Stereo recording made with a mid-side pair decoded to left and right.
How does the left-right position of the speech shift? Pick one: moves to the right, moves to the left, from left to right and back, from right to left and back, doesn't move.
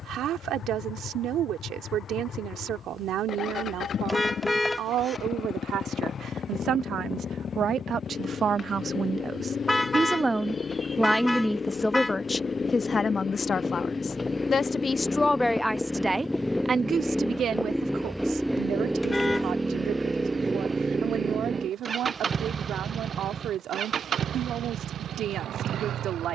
from right to left and back.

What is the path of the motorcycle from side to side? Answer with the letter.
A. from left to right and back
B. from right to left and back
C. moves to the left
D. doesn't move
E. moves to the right
E.